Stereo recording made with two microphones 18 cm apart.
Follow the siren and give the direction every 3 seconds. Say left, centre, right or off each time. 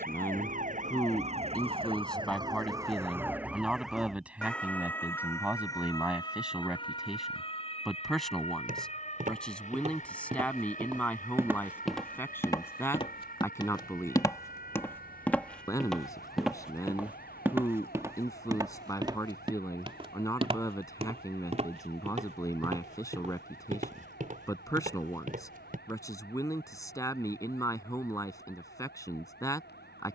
right, centre, left, left, left, left, left, left, left, left.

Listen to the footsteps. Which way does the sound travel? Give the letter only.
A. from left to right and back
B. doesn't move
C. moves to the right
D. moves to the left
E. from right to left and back
E.